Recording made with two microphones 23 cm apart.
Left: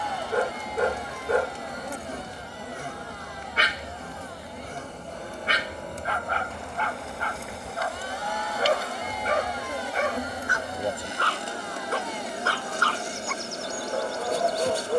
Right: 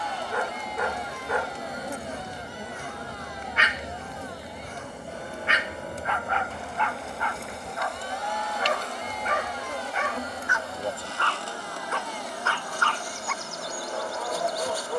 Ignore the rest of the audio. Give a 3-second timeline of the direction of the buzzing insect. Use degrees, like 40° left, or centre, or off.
centre, 10° right, centre, 20° left, 30° left.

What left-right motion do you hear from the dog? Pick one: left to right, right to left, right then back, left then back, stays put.
stays put.